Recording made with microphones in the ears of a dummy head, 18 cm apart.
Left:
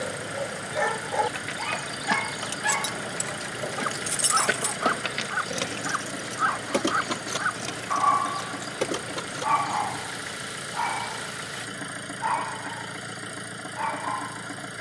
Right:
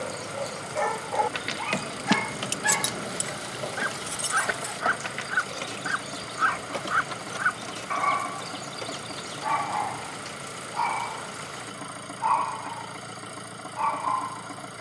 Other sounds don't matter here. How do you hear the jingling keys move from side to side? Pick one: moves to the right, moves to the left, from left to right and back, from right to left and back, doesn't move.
moves to the left.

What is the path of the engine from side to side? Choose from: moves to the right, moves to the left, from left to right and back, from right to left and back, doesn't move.
doesn't move.